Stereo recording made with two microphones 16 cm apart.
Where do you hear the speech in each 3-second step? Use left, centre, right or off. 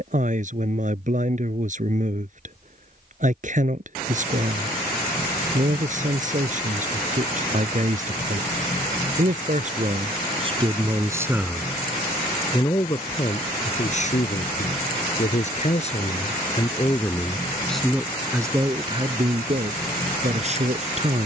right, right, right, right, left, left, right.